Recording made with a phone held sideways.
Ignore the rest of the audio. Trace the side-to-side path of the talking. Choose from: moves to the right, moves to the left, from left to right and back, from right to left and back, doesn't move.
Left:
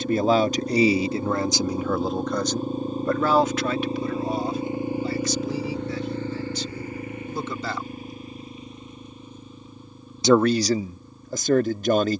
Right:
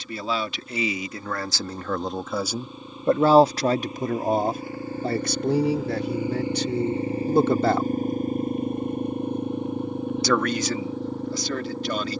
from left to right and back.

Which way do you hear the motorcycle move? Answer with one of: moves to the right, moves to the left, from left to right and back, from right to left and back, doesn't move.
moves to the right.